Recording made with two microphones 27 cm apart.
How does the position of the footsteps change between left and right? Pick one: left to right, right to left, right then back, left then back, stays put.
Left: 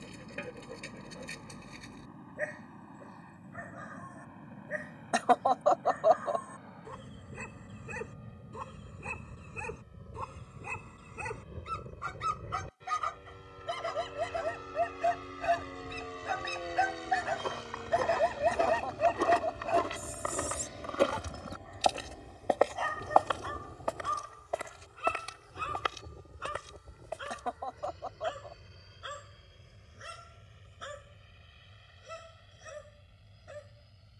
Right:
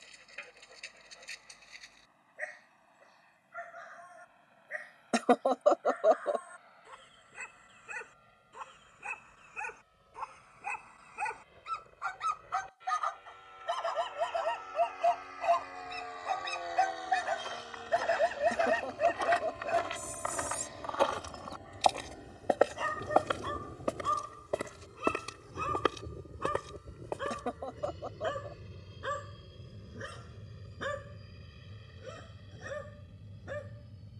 left to right.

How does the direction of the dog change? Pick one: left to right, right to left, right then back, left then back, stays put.
left to right.